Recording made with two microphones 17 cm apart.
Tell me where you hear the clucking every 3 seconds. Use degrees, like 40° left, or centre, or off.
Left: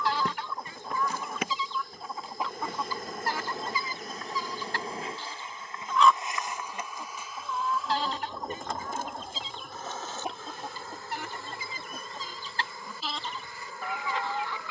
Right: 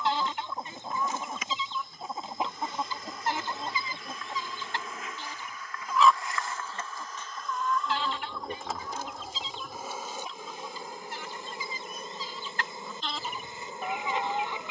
20° right, 20° right, 30° left, 60° left, 10° left.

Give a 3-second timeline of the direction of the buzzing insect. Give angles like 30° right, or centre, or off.
70° left, 40° left, 10° left, 10° right, 20° right.